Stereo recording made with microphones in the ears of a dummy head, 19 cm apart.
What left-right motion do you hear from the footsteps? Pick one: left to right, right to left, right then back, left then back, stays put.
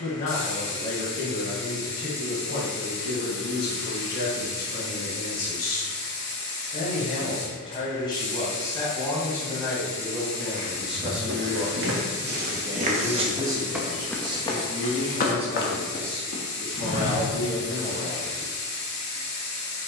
right to left.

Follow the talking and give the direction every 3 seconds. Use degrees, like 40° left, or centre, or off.
50° left, 50° left, 20° left, centre, 20° right, 30° right, 30° right.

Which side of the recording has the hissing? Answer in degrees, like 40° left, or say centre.
30° left.